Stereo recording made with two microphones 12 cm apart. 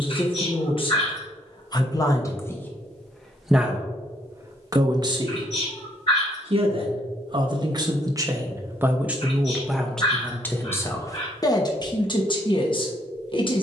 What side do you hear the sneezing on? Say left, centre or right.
left.